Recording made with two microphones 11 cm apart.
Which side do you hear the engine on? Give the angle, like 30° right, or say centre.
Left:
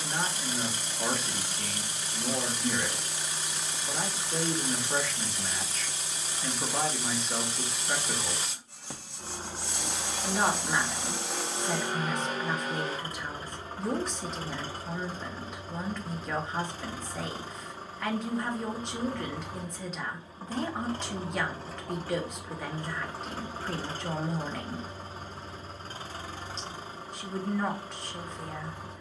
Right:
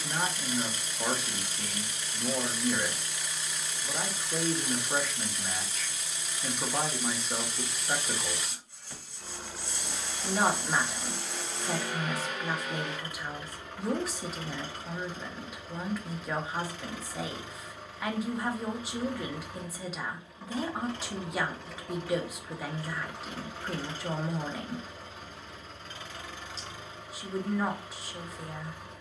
30° left.